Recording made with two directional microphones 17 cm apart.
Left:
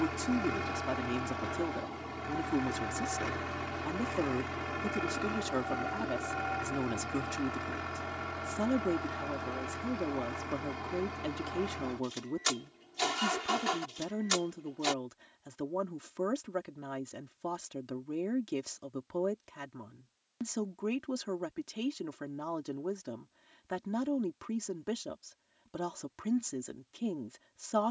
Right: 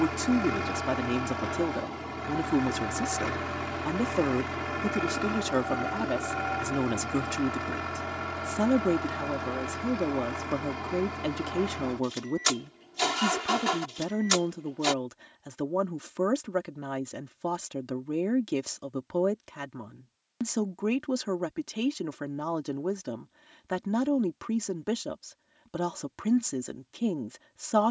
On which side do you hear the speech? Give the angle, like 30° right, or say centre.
40° right.